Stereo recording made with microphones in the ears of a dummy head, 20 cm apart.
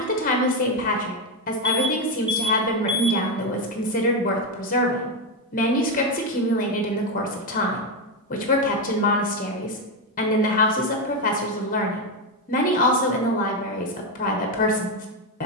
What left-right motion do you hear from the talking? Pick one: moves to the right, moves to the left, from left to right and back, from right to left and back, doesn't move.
doesn't move.